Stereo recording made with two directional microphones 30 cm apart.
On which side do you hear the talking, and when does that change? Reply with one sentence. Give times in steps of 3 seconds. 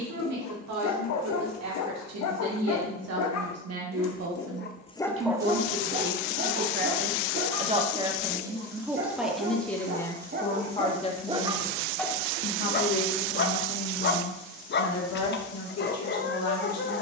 You can hear the talking on the right from 0 s, in the centre from 9 s and on the left from 12 s.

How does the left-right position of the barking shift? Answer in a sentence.
You can hear the barking move from left to right and back again.